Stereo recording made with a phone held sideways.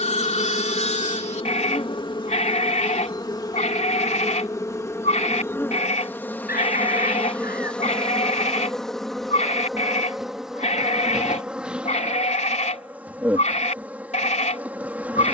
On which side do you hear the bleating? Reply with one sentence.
You can hear the bleating on the left.